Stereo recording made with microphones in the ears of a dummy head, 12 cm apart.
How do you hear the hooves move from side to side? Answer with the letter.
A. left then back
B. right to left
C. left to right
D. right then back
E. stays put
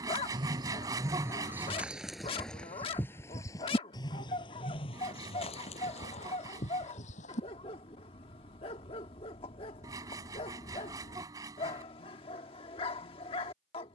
B.